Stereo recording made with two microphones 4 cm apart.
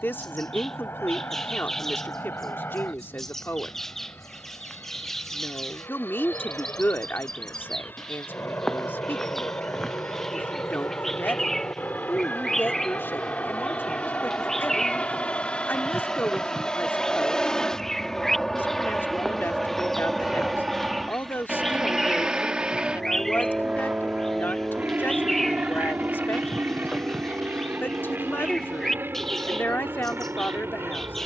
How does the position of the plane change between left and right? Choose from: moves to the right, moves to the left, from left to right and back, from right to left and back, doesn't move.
moves to the right.